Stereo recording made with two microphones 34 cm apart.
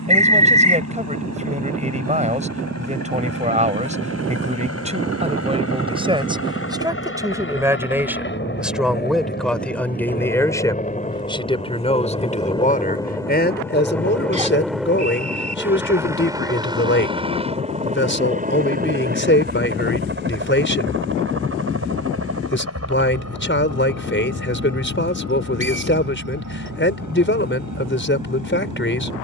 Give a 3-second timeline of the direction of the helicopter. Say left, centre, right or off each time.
left, left, left, left, centre, centre, right, right, right, right.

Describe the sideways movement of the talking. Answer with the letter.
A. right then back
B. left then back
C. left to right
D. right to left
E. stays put
D.